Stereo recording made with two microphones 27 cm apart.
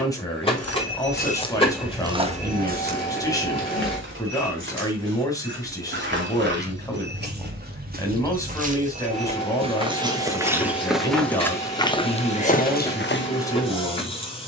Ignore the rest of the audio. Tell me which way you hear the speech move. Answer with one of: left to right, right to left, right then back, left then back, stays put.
stays put.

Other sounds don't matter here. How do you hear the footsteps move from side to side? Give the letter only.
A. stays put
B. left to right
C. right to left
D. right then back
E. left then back
D.